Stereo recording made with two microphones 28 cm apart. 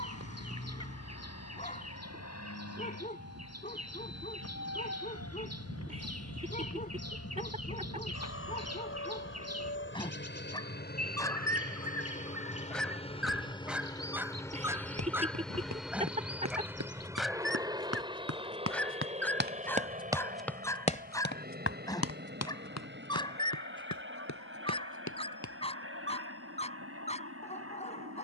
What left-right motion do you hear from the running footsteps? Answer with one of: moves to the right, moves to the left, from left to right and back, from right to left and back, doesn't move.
moves to the left.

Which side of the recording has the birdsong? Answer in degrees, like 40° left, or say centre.
60° right.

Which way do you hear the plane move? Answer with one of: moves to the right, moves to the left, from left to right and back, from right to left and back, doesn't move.
moves to the right.